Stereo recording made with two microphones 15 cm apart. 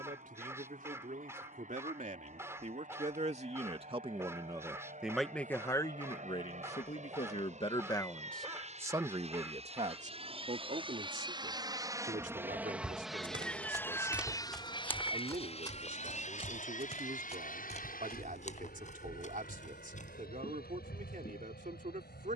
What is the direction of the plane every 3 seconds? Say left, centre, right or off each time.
right, right, right, right, centre, left, left, left.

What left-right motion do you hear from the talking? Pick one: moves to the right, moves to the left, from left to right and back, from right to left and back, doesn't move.
from right to left and back.